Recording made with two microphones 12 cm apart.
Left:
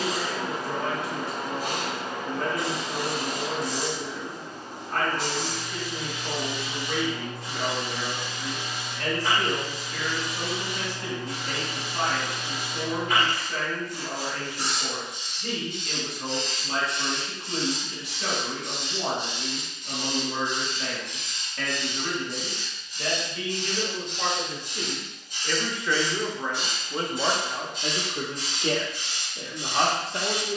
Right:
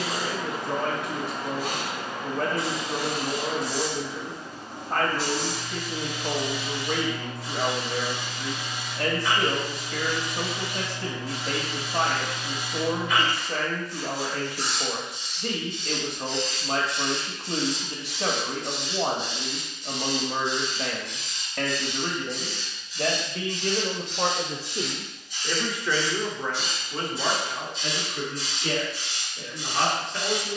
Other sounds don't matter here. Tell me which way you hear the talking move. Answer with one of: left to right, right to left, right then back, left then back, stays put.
right to left.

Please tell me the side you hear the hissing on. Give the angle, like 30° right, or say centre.
50° left.